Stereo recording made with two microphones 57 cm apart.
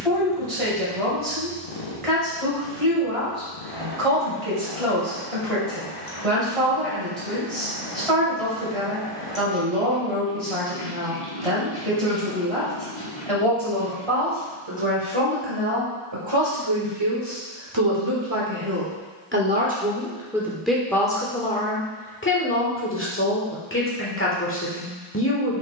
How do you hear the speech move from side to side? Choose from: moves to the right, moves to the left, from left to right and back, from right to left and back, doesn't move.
moves to the left.